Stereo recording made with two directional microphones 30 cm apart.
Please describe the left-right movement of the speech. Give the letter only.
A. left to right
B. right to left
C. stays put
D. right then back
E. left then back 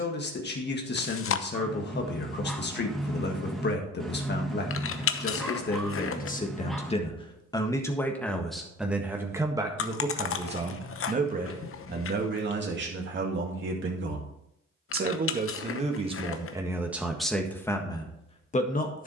D.